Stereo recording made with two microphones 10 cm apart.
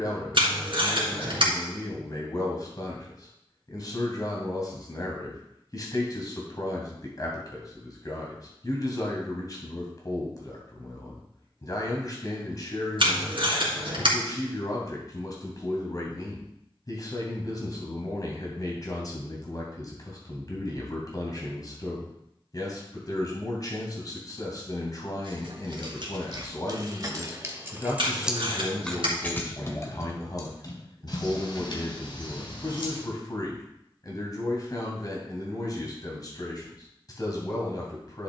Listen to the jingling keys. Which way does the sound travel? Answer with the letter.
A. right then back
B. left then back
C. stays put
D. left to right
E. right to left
E.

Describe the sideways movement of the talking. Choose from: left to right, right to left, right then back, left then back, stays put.
stays put.